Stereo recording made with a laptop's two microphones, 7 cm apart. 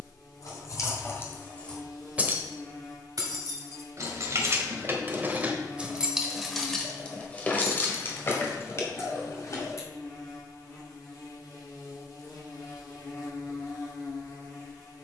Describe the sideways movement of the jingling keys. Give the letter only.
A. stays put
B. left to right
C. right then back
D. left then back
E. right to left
C.